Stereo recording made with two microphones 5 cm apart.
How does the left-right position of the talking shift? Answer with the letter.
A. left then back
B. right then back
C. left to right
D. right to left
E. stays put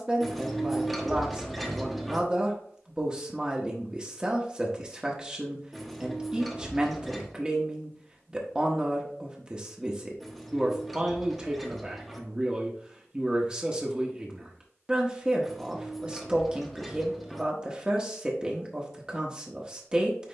E.